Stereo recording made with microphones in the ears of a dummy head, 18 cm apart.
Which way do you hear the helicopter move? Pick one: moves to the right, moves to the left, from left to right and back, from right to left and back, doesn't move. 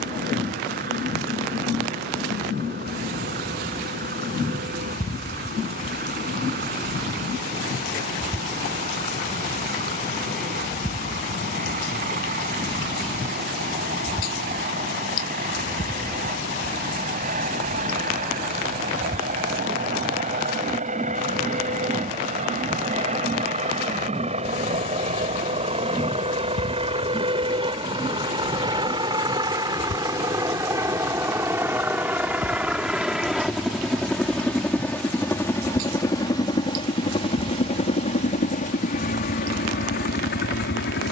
moves to the left.